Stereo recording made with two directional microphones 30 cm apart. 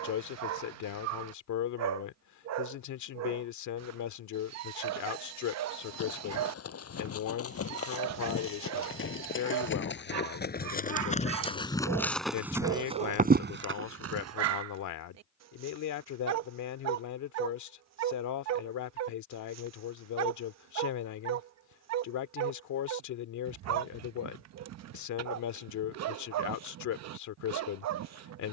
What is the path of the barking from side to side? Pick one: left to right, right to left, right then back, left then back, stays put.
stays put.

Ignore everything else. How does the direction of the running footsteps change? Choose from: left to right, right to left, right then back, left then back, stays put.
left to right.